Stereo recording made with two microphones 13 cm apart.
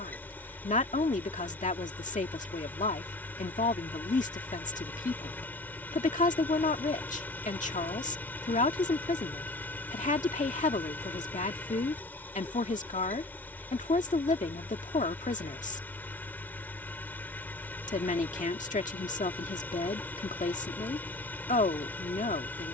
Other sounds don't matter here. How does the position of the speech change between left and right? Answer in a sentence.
In this clip you hear the speech stay put.